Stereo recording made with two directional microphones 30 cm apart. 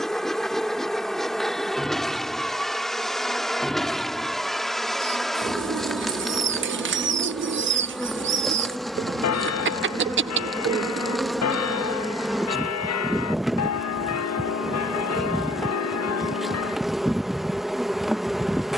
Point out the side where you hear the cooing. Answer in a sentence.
In this clip you hear the cooing on the right.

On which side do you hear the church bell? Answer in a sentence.
You can hear the church bell on the left.